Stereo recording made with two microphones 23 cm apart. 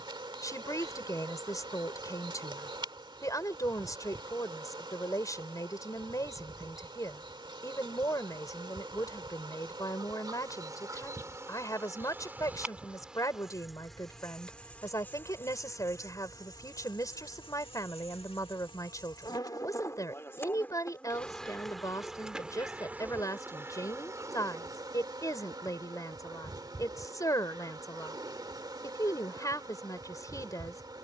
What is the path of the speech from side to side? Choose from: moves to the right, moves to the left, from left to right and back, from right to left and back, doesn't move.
doesn't move.